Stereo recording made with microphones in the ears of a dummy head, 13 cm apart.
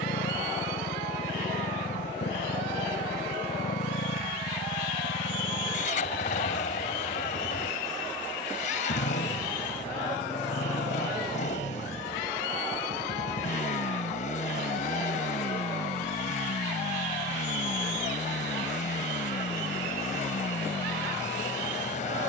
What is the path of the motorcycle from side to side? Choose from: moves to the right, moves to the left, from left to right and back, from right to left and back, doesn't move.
doesn't move.